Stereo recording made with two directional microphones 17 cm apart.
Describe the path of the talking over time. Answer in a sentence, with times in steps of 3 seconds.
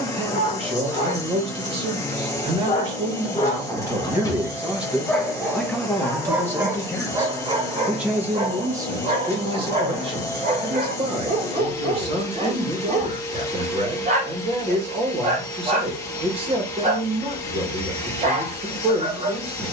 You can hear the talking on the right from 0 s, in the centre from 3 s and on the right from 9 s.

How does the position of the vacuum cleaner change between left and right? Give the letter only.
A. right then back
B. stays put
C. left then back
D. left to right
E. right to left
B.